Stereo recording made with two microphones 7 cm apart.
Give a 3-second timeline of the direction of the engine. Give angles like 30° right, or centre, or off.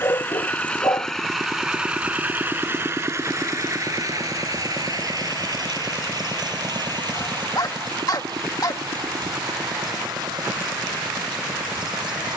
centre, 50° right, 70° right, 80° right.